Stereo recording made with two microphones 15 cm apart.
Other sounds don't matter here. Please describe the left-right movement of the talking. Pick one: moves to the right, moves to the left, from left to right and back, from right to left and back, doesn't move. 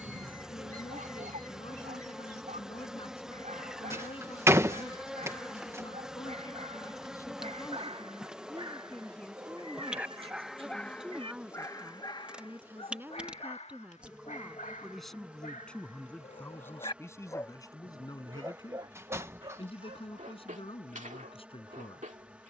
from left to right and back.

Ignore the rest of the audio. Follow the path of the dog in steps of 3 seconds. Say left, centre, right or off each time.
right, right, right, centre, left, left, right, right.